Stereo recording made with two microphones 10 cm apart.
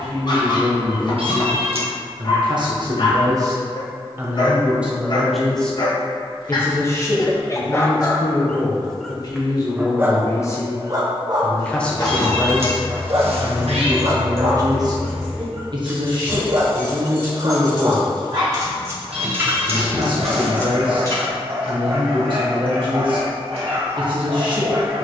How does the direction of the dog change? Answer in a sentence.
In this clip you hear the dog travel towards the right.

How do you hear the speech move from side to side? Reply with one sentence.
In this clip you hear the speech move from right to left and back again.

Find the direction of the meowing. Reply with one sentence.
In this clip you hear the meowing on the right.